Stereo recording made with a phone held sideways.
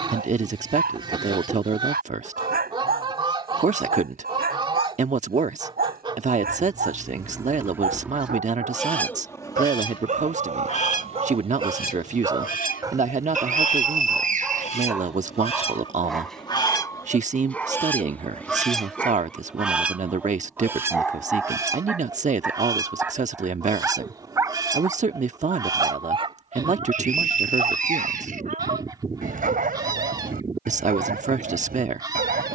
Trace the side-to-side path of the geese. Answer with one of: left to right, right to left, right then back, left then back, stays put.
left then back.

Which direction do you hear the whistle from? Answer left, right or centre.
right.